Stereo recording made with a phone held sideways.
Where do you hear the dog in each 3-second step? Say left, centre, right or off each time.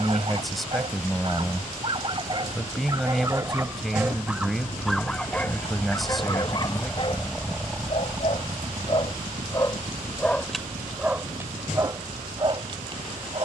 right, centre, left, centre, right.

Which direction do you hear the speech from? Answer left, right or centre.
centre.